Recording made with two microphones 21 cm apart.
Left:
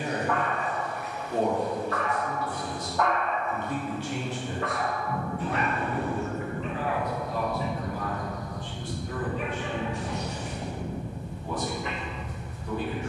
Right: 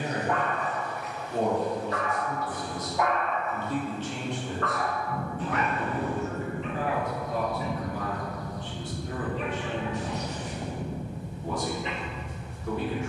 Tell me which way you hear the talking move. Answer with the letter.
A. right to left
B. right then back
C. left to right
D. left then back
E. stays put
C.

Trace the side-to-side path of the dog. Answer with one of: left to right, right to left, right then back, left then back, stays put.
left then back.